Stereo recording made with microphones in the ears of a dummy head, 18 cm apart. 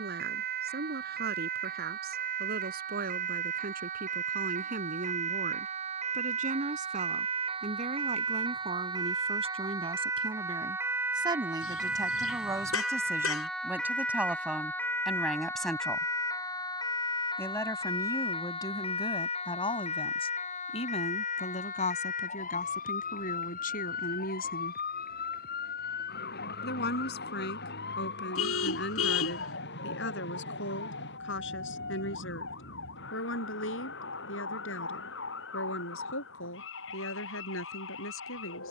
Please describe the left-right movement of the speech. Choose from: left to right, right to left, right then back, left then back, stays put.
right to left.